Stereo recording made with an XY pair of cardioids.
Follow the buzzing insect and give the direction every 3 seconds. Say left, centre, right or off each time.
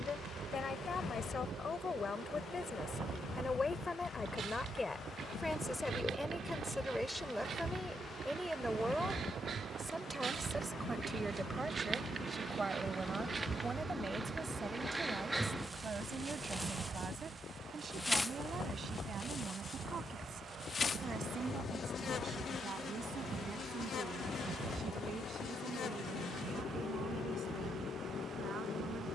right, right, right, right, right, centre, left, left, left, left.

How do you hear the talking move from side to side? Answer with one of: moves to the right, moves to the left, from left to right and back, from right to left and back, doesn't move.
moves to the right.